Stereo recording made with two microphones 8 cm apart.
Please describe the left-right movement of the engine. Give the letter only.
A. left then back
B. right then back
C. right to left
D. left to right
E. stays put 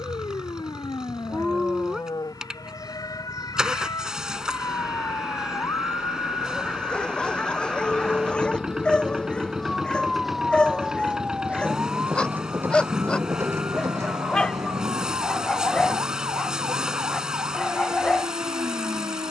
E.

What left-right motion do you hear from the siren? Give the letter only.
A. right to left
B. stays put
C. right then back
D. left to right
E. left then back
D.